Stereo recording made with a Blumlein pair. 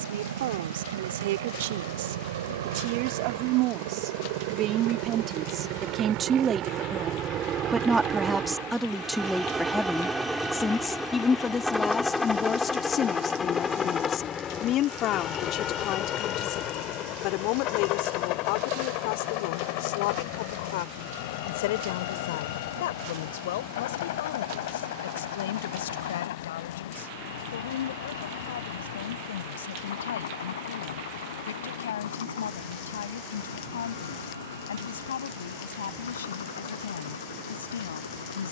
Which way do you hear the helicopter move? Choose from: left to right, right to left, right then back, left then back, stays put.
right to left.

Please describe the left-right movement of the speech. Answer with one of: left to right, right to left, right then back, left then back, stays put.
right to left.